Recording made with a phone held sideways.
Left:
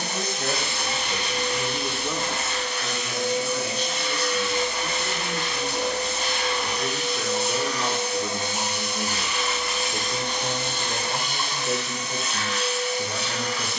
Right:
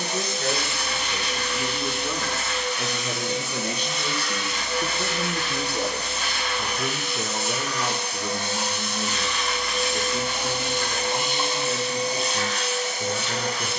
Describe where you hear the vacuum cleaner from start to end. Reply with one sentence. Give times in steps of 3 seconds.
You can hear the vacuum cleaner on the left from 0 s, in the centre from 9 s and on the right from 12 s.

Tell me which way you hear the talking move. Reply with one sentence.
In this clip you hear the talking go right and come back.